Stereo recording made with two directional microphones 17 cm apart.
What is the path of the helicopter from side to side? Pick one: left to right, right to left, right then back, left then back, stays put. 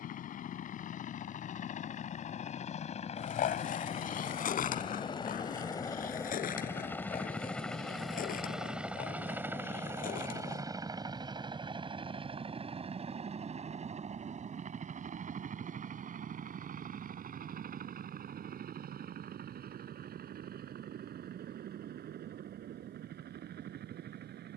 left to right.